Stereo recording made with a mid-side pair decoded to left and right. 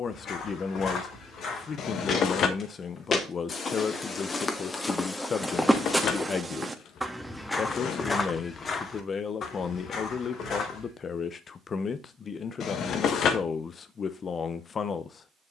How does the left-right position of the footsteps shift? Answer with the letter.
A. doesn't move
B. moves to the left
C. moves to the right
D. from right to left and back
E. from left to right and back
E.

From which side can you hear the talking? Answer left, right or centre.
left.